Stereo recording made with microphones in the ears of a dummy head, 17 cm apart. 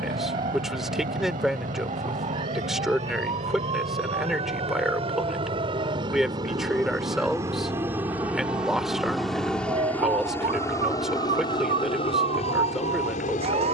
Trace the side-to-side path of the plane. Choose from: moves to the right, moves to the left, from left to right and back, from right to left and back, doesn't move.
moves to the left.